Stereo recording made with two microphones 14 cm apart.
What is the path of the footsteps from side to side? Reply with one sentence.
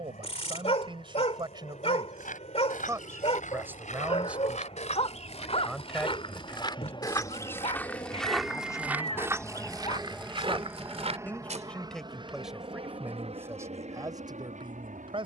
In this clip you hear the footsteps travel towards the right.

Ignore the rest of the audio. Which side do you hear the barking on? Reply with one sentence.
You can hear the barking on the left.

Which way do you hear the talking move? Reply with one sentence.
You can hear the talking go left and come back.